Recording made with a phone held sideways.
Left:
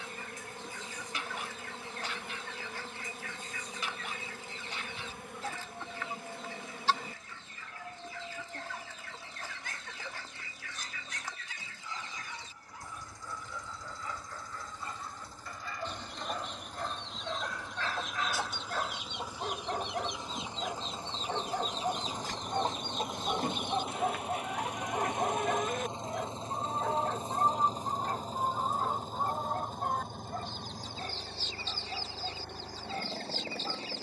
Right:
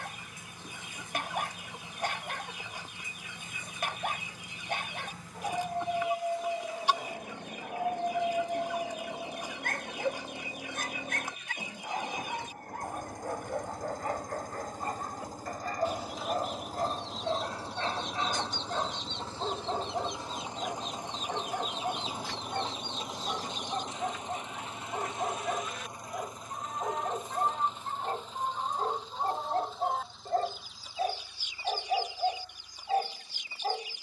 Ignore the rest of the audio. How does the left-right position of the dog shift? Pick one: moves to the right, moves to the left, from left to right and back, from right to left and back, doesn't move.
from right to left and back.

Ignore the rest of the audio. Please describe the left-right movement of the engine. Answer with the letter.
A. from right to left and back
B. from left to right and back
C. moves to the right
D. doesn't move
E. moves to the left
E.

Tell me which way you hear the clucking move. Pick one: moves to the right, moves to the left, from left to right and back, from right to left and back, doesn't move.
from right to left and back.